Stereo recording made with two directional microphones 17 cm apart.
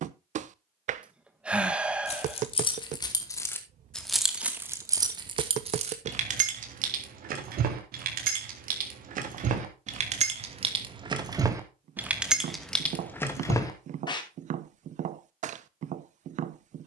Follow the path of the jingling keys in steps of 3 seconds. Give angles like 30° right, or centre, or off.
30° left, 10° right, 60° right, 40° right, 10° left, off.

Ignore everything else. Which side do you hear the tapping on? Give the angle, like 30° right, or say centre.
50° right.